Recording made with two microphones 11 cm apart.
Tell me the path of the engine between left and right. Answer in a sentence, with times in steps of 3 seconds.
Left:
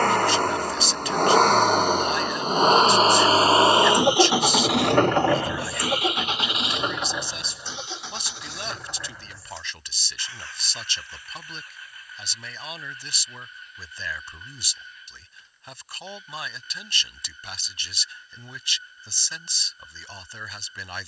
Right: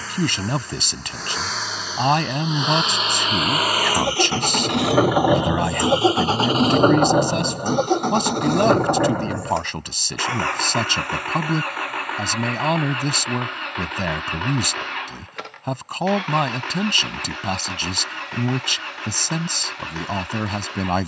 You can hear the engine on the left from 0 s, in the centre from 3 s and on the right from 6 s.